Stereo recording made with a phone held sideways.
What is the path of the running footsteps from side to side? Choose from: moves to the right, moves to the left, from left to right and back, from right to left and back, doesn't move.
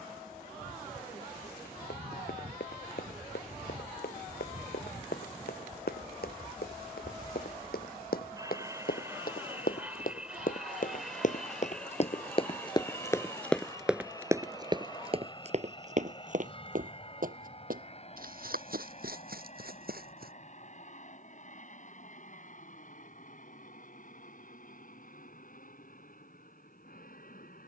moves to the right.